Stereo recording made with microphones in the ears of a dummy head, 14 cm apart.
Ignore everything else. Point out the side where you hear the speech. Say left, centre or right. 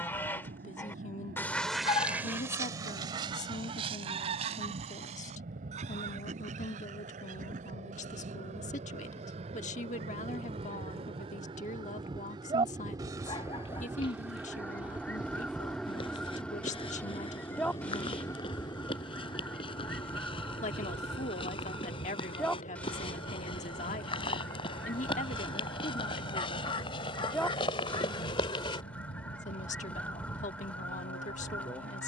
left.